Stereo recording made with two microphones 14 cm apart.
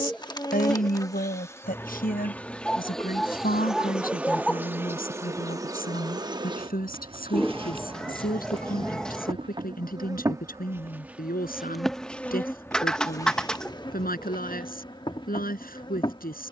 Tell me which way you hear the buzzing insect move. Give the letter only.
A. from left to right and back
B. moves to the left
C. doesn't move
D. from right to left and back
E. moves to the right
A.